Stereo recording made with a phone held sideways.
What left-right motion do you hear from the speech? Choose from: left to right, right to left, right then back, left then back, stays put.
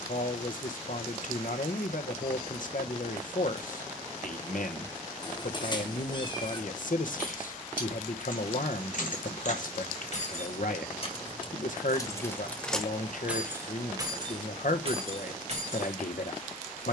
stays put.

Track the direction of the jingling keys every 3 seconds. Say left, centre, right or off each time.
off, off, left, left, centre, right.